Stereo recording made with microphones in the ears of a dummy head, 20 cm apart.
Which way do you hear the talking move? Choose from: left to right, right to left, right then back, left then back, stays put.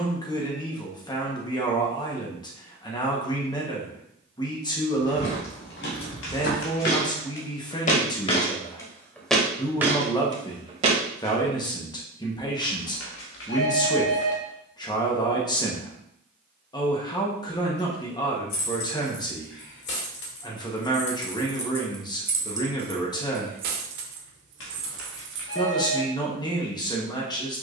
stays put.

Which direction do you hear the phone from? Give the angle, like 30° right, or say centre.
60° left.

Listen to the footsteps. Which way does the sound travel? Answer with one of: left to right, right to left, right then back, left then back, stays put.
left to right.